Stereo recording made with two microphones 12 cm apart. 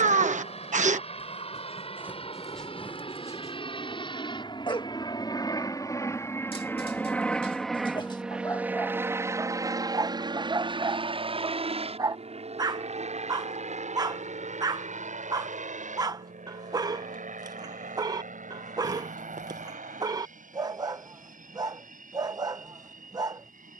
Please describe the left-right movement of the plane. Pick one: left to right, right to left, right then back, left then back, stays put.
left to right.